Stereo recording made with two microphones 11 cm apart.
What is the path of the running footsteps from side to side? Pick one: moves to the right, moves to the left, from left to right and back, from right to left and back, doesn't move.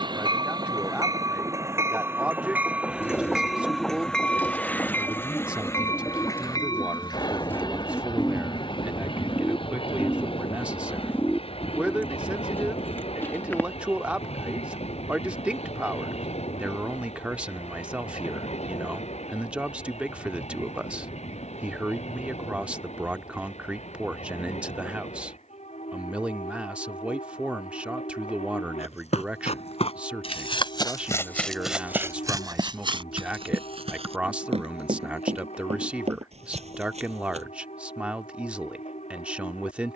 moves to the right.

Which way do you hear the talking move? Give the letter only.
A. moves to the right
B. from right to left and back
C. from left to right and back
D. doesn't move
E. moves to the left
D.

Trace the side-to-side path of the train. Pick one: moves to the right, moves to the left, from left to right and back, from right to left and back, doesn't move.
moves to the left.